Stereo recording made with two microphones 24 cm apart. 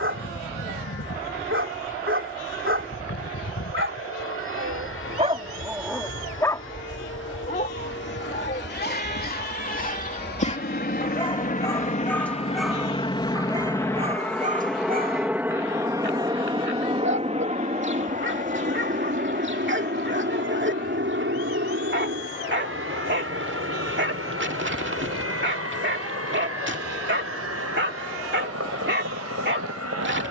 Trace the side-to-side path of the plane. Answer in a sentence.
In this clip you hear the plane go from the left side to the right.